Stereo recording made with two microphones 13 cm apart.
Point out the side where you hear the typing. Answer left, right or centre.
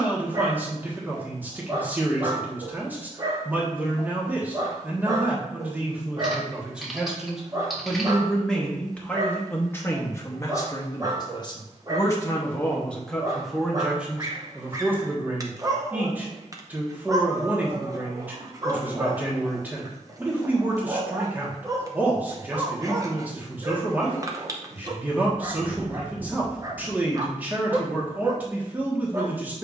centre.